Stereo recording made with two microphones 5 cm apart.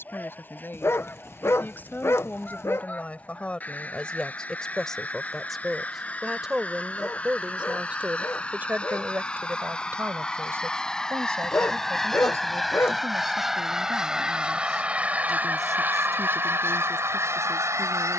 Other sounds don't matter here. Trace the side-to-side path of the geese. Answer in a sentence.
You can hear the geese travel towards the right.